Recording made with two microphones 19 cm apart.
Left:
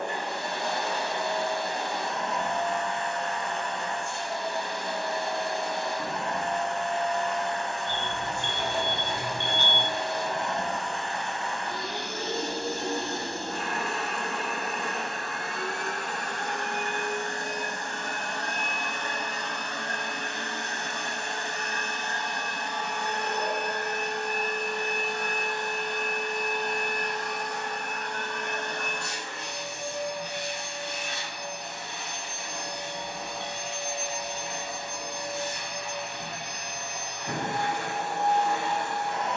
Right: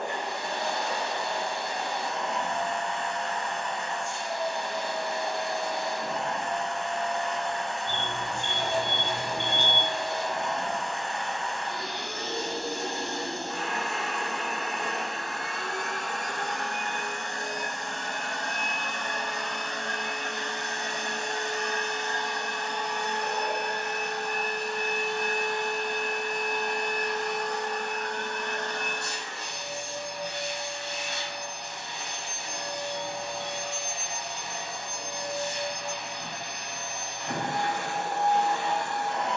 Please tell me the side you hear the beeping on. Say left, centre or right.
right.